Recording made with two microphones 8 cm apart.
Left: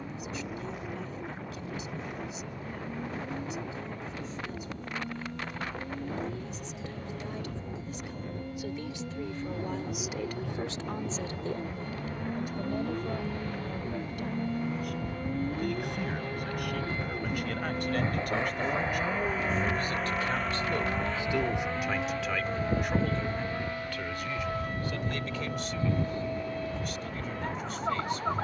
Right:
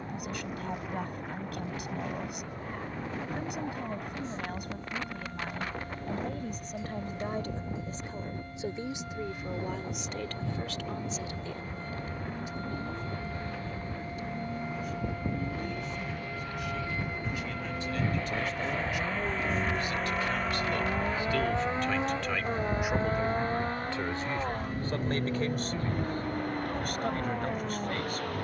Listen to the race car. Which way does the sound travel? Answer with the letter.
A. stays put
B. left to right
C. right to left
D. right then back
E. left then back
B.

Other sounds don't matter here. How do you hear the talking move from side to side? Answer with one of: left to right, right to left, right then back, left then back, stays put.
left then back.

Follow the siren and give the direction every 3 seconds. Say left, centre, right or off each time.
right, right, right, right, right, right, centre, left, left, left.